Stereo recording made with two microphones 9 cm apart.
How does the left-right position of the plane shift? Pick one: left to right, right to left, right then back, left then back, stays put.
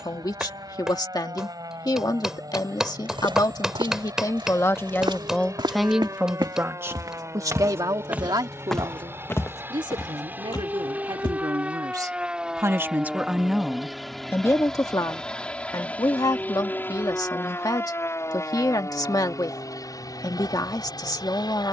right to left.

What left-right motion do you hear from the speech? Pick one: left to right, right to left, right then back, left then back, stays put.
right then back.